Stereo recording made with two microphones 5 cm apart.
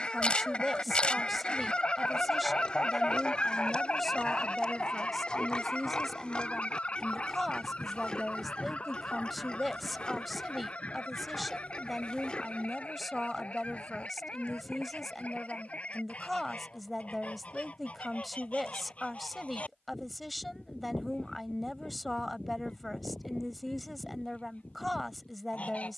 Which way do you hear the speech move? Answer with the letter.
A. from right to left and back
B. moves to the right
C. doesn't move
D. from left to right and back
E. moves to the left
C.